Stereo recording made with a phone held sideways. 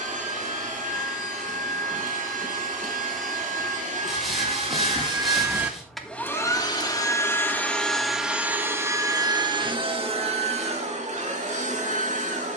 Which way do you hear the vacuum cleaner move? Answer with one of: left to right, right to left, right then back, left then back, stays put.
left then back.